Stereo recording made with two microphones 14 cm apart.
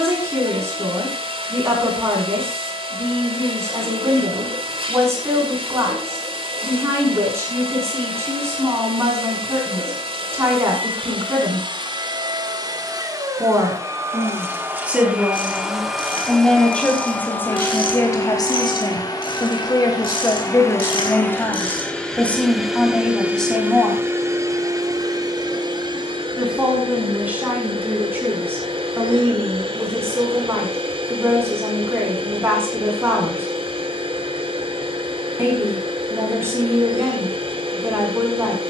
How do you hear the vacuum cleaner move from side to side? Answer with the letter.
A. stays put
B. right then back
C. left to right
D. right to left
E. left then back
E.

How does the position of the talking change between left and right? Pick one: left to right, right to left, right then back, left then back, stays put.
left then back.